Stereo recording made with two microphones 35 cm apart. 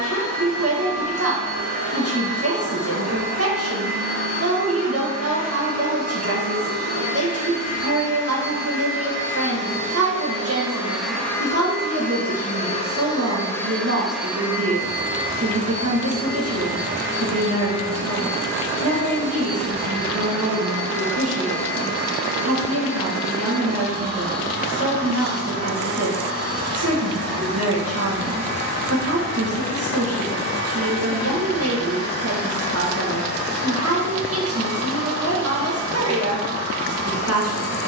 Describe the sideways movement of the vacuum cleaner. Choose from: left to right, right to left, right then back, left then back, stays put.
left then back.